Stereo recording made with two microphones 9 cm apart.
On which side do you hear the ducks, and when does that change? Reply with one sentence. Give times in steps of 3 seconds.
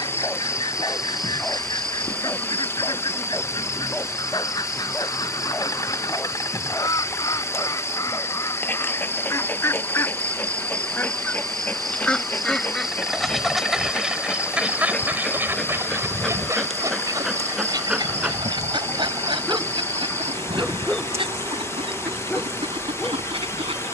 In this clip you hear the ducks on the left from 0 s, in the centre from 12 s and on the right from 15 s.